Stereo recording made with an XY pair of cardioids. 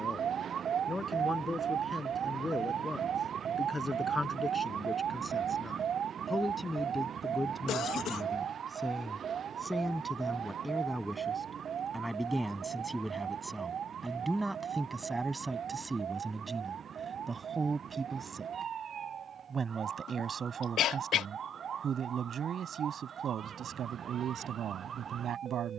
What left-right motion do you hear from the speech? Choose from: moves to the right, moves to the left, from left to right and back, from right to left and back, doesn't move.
moves to the right.